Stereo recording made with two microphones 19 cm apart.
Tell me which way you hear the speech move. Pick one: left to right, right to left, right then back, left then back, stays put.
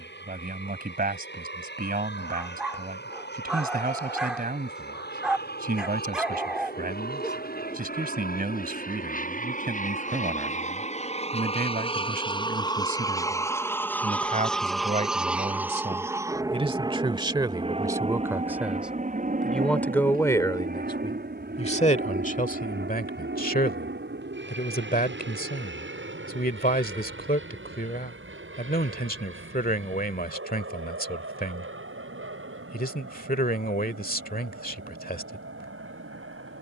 right to left.